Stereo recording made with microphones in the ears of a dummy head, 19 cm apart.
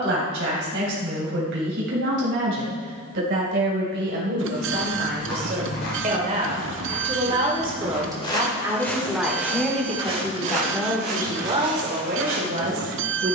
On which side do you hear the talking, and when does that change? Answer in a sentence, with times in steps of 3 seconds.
You can hear the talking on the right from 0 s, in the centre from 9 s and on the right from 12 s.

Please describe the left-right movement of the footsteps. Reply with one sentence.
In this clip you hear the footsteps go from the left side to the right.